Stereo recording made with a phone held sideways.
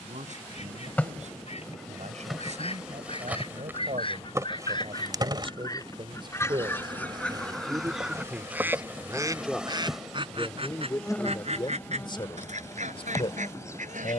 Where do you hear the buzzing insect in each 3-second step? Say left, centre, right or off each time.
centre, right, right, centre, left.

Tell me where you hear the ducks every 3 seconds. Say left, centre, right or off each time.
left, left, centre, right, right.